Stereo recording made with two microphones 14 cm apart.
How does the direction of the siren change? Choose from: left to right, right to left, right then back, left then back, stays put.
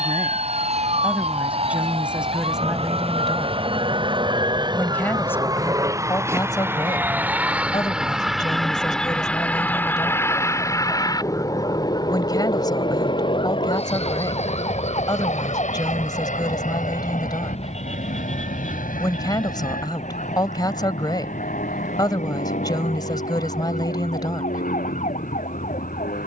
right to left.